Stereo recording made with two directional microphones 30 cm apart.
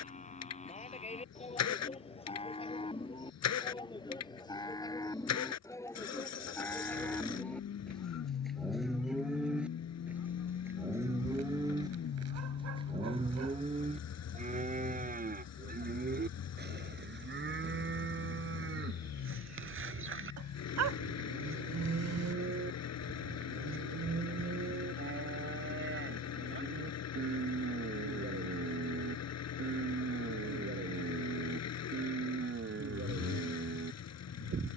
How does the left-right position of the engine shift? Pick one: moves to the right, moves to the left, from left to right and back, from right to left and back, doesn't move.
doesn't move.